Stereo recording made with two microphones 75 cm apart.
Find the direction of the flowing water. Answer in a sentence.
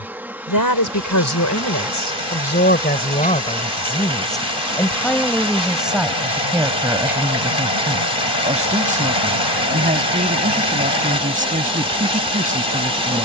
You can hear the flowing water on the left.